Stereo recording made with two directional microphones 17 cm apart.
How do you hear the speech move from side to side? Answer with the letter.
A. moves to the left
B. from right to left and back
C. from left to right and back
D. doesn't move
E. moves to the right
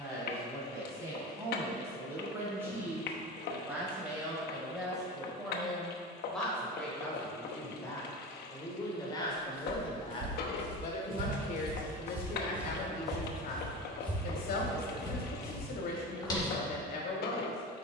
A.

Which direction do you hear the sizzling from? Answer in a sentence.
You can hear the sizzling on the left.